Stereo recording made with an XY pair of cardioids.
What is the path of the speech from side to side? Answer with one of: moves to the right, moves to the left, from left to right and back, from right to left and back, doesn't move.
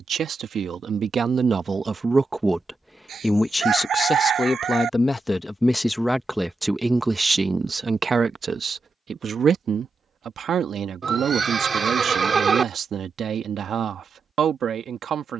from right to left and back.